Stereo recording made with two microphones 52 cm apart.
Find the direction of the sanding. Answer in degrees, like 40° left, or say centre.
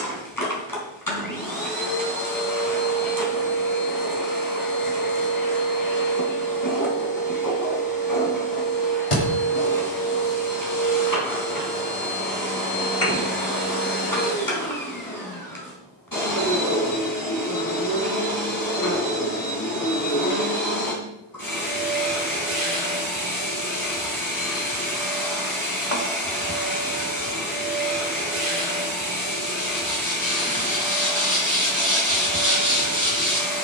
10° right.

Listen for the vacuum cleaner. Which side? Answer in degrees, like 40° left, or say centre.
40° left.